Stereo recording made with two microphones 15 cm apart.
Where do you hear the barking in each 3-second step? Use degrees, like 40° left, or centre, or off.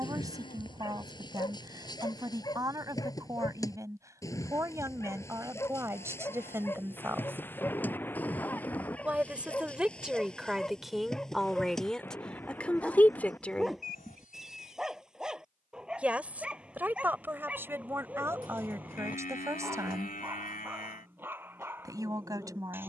30° left, 20° left, 10° left, 10° left, centre, 10° right, 10° right, 10° right.